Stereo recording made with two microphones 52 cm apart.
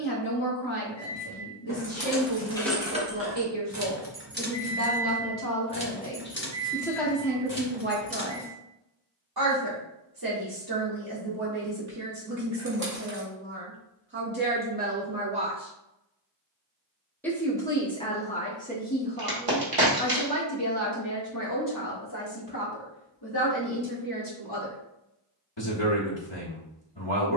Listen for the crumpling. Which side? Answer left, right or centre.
right.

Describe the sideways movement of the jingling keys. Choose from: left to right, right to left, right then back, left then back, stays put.
right then back.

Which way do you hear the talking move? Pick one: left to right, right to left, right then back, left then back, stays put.
right then back.